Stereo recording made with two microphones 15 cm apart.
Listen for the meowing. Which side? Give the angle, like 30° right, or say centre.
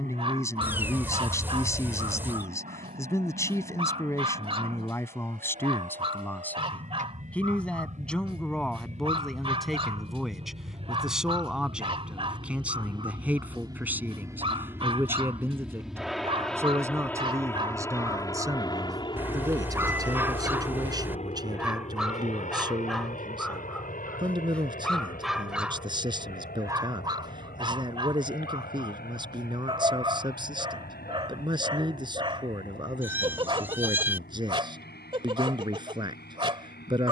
10° right.